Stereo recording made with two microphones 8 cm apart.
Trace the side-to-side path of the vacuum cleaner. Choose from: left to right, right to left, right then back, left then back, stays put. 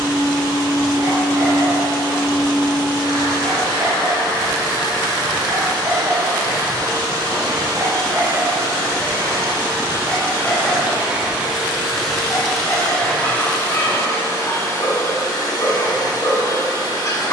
right to left.